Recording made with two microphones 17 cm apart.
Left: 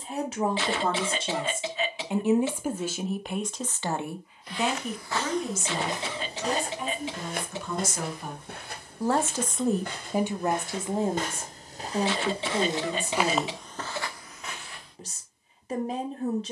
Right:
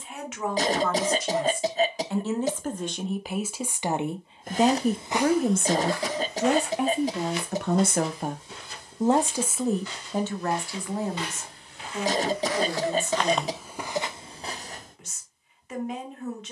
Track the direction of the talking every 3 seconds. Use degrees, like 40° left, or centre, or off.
20° left, 30° right, 60° right, 10° left, 30° left, 30° left.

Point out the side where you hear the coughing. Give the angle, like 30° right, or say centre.
40° right.